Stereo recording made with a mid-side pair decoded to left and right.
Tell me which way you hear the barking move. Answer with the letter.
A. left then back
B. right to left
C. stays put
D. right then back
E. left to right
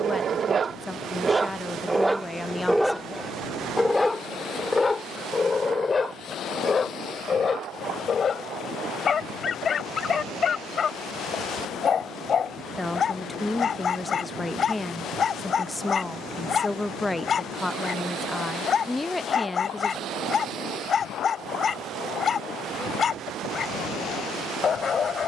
B.